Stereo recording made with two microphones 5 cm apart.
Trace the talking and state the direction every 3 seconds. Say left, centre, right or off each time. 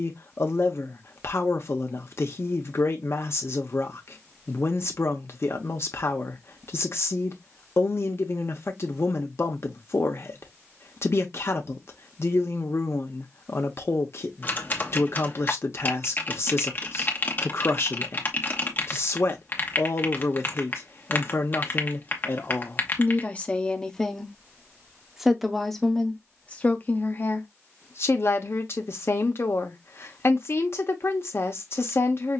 left, left, left, left, left, left, left, left, centre, left, left.